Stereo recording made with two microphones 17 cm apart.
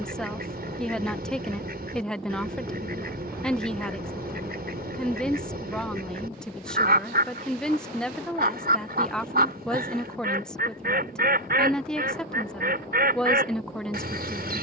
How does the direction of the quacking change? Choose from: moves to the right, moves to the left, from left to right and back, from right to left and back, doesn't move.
doesn't move.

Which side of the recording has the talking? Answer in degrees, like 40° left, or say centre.
centre.